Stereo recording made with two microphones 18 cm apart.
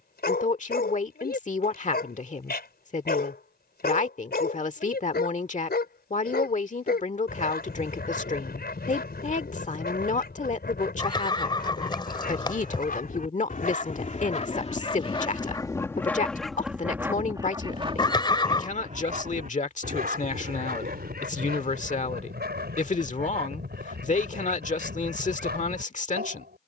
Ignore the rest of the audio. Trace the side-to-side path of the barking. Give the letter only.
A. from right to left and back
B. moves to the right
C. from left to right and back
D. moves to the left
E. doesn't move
B.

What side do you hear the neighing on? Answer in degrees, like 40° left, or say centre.
30° left.